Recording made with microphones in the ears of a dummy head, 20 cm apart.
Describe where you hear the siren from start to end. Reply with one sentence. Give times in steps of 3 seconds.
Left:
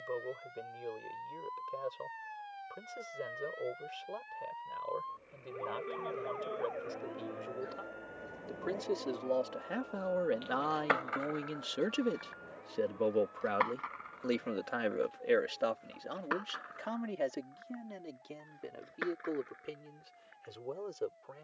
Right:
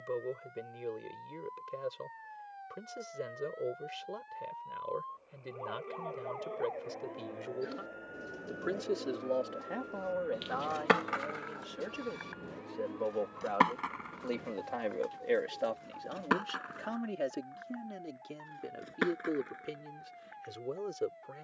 You can hear the siren on the left from 0 s, in the centre from 6 s and on the right from 9 s.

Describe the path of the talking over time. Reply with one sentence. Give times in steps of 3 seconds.
In this clip you hear the talking on the right from 0 s, on the left from 9 s, in the centre from 15 s and on the right from 18 s.